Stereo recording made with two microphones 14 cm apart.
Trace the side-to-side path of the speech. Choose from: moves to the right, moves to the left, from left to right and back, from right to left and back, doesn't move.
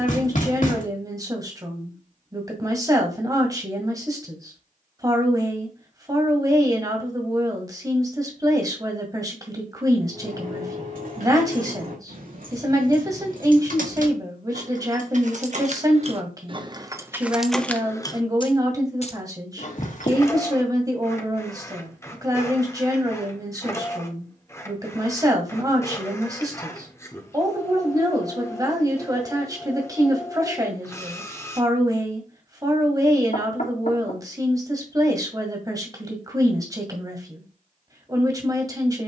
doesn't move.